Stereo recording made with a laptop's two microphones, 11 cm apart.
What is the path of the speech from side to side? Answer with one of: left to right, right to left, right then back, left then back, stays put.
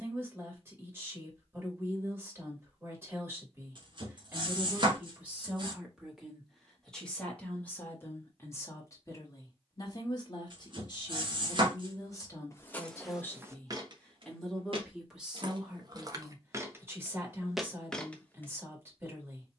left then back.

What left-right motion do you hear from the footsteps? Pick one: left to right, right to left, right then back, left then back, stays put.
right then back.